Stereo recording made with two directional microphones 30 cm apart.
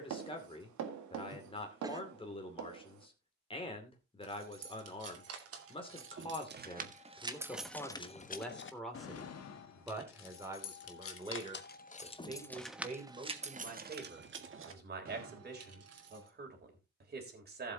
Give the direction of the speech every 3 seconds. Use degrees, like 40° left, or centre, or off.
20° left, 20° left, 10° left, 10° right, 30° right, 30° right.